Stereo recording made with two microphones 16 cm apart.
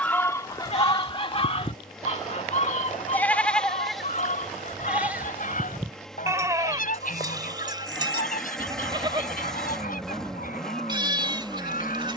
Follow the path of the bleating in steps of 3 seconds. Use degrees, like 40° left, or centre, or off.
40° left, centre, 30° right, 30° right.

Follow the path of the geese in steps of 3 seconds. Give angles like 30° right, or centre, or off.
40° left, 60° left, 70° left, 70° left.